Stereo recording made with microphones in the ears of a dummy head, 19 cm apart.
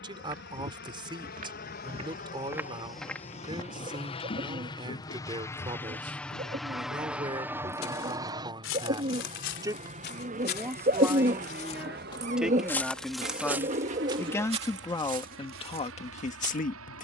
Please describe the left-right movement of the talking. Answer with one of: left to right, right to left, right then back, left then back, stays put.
right to left.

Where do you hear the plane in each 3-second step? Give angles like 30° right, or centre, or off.
50° left, 20° left, 10° right, 40° right, 50° right, 60° right.